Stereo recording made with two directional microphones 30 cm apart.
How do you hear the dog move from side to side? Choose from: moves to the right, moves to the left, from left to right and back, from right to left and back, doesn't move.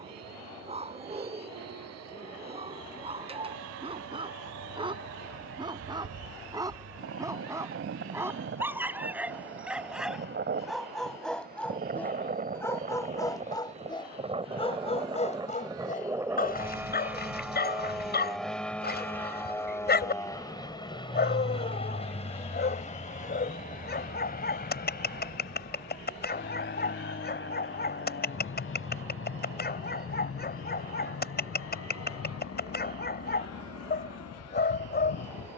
moves to the left.